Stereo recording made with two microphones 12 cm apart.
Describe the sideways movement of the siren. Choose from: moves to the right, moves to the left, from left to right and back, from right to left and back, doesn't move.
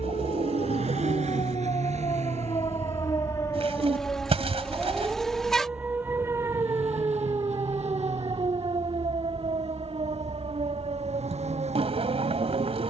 moves to the right.